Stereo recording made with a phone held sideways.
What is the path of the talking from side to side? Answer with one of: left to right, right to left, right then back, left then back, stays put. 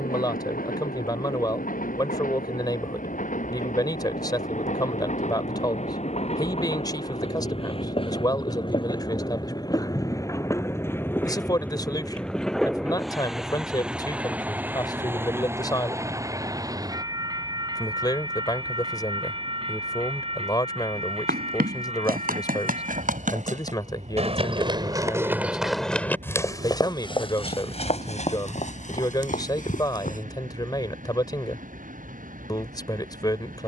stays put.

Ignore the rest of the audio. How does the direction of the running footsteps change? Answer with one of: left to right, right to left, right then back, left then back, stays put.
right to left.